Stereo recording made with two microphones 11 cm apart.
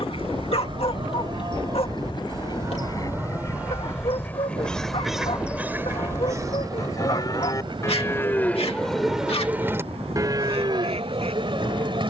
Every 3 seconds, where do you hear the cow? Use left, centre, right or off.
right, centre, left, right.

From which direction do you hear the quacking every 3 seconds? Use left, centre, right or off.
left, centre, right, right.